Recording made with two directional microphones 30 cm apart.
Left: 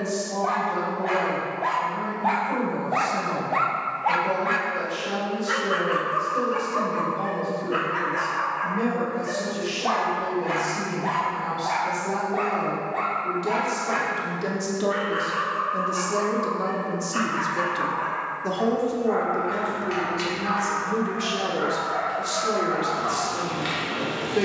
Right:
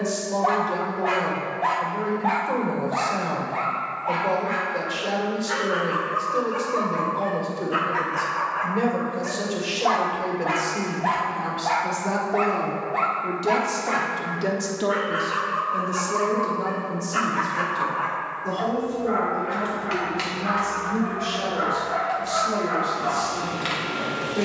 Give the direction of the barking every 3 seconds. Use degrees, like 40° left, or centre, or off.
10° right, 40° left, centre, 20° right, 20° right, 20° right, 20° right, 20° right.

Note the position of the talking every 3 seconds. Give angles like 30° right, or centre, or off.
50° right, 50° right, 50° right, 50° right, 30° right, 10° left, 50° left, 60° left.